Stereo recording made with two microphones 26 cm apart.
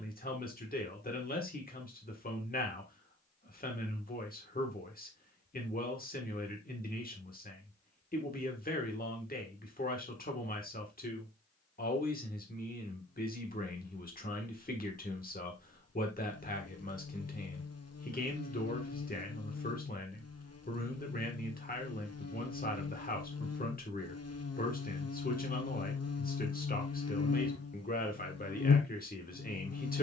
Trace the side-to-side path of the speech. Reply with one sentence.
In this clip you hear the speech stay in one place.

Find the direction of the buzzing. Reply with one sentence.
You can hear the buzzing on the left.